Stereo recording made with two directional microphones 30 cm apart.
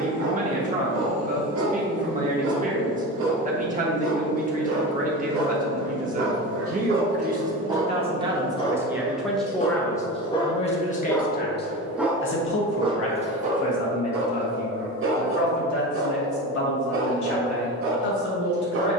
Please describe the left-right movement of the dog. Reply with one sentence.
You can hear the dog move from right to left and back again.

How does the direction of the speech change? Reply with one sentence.
You can hear the speech move to the left.